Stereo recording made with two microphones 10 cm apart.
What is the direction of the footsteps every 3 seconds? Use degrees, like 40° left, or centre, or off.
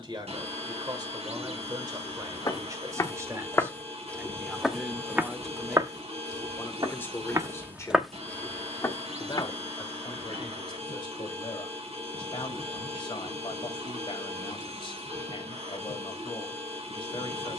40° left, centre, 20° right, 40° left, off, off.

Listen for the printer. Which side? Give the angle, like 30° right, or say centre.
80° right.